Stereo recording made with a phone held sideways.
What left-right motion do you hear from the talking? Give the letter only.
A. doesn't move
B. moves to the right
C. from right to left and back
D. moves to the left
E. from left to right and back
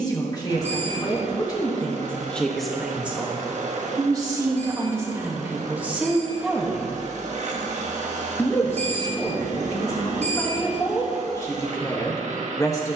E.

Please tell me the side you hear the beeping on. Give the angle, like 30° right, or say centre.
60° right.